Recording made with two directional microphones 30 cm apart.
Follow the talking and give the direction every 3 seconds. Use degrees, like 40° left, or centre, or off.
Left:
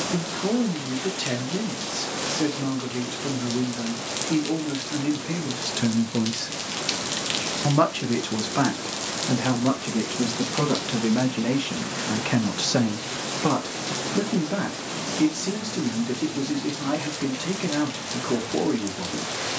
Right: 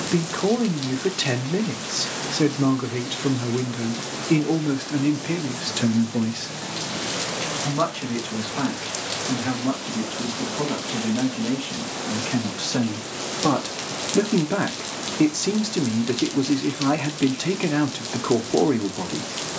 30° right, 20° right, 30° left, 50° left, centre, 30° right, 30° right.